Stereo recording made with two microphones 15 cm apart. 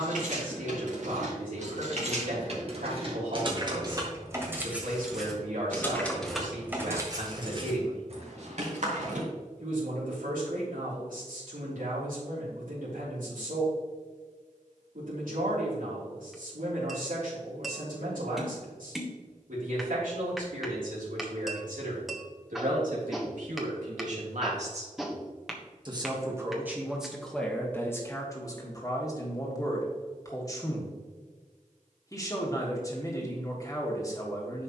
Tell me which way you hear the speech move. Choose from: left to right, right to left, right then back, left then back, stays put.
right to left.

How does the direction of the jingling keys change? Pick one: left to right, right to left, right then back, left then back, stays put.
left then back.